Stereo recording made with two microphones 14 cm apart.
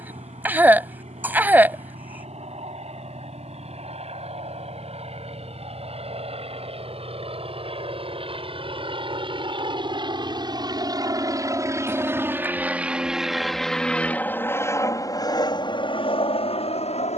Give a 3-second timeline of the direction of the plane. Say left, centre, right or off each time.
right, right, right, right, centre, left.